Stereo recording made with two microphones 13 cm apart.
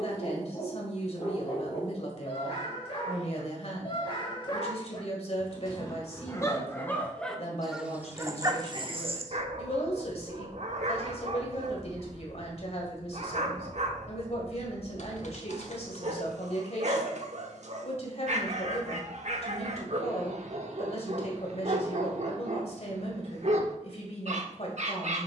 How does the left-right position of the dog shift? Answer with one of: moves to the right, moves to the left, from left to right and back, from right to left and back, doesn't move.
moves to the right.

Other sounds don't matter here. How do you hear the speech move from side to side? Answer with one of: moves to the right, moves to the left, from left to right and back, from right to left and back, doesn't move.
doesn't move.